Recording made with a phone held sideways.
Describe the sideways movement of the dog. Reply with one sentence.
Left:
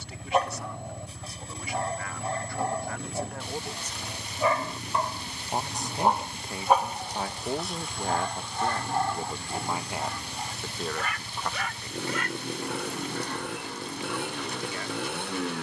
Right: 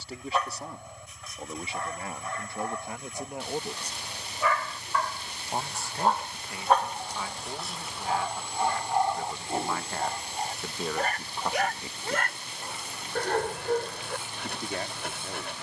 You can hear the dog move from left to right.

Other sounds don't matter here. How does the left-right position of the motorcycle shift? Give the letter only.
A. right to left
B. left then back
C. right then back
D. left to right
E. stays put
E.